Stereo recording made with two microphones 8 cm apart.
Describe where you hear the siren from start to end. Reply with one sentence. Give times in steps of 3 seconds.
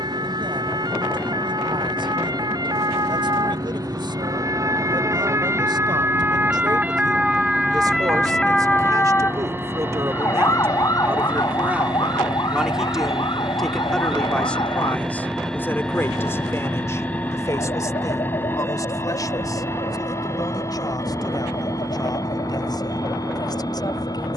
In this clip you hear the siren on the right from 0 s, in the centre from 6 s and on the left from 9 s.